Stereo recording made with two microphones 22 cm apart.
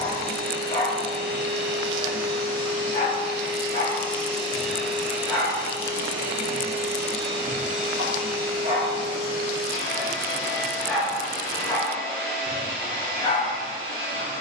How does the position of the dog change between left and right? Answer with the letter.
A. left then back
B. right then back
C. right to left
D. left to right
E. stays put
B.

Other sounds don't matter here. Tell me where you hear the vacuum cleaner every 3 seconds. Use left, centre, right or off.
left, centre, right, right, right.